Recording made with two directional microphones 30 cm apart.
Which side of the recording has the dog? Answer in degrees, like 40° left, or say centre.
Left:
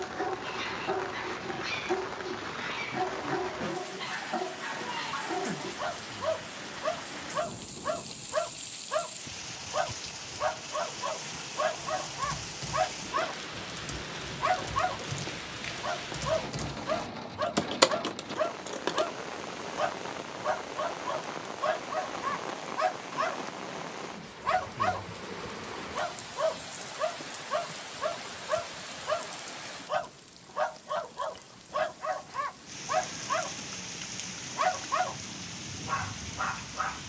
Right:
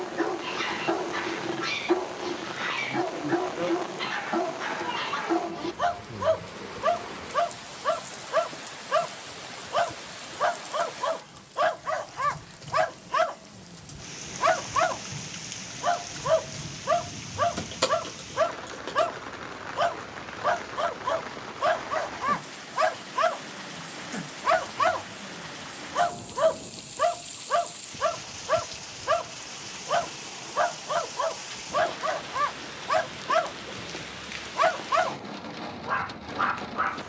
30° right.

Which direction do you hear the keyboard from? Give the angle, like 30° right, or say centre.
40° left.